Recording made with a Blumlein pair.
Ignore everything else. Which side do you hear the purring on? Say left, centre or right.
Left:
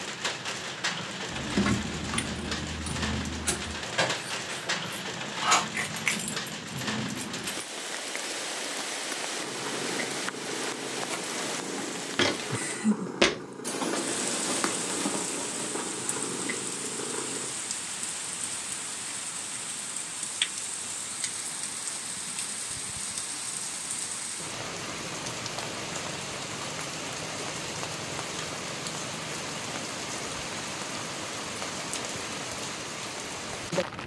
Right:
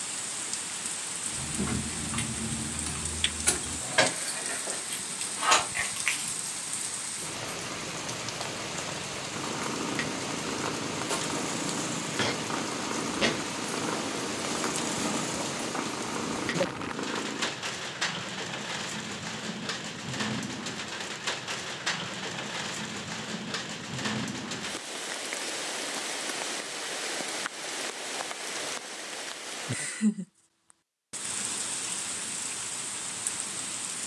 right.